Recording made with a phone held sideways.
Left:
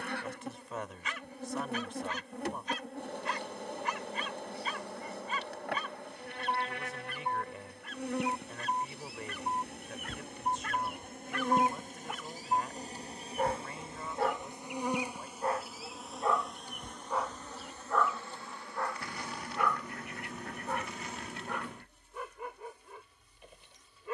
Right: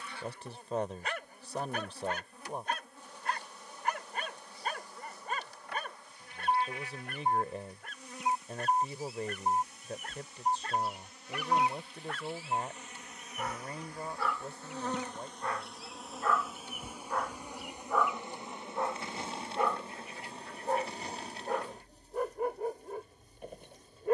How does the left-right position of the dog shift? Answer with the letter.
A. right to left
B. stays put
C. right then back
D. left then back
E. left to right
D.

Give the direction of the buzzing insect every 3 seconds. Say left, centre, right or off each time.
left, left, left, left, left, centre, right, right.